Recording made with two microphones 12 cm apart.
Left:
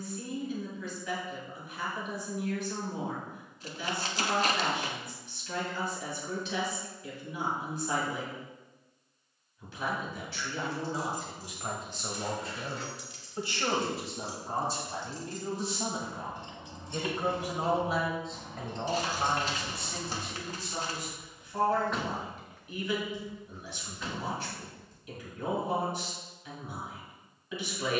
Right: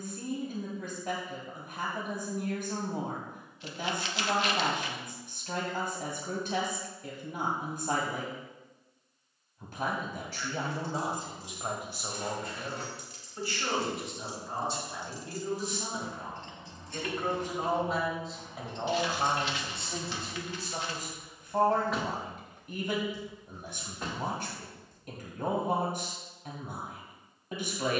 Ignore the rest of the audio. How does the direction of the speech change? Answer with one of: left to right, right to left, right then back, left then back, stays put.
left then back.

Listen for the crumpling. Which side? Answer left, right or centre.
left.